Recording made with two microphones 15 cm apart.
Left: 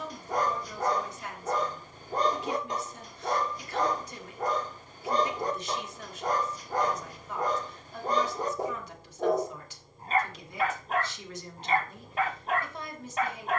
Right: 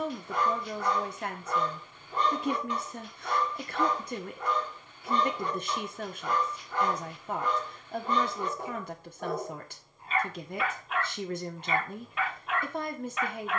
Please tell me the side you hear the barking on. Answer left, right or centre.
left.